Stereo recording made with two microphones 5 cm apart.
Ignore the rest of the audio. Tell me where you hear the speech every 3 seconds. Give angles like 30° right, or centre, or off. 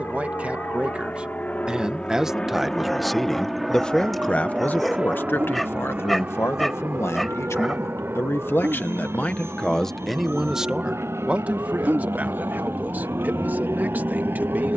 20° right, 30° left, 60° left, centre, 40° right.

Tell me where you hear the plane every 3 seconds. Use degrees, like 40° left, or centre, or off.
30° left, 10° right, 40° right, 60° right, 60° right.